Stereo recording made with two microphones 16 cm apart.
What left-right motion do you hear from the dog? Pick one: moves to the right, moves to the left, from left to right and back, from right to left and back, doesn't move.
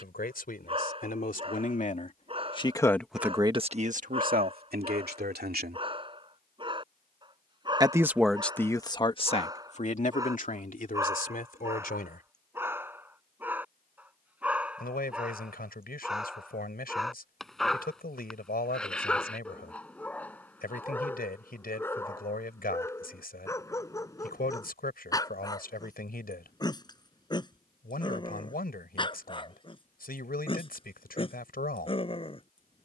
moves to the left.